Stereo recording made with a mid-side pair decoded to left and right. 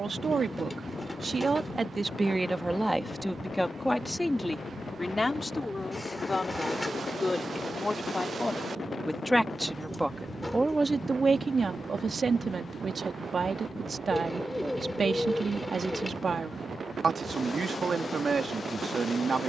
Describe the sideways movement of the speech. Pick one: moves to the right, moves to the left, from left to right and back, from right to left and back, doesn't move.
from right to left and back.